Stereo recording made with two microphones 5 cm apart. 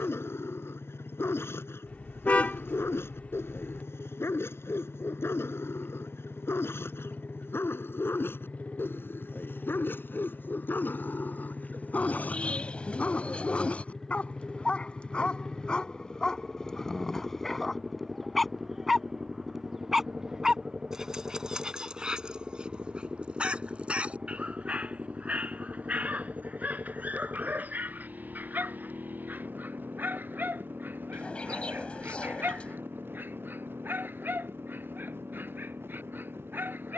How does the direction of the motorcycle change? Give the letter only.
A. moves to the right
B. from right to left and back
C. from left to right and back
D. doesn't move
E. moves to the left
A.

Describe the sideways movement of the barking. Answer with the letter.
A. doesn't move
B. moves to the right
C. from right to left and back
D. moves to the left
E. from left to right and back
B.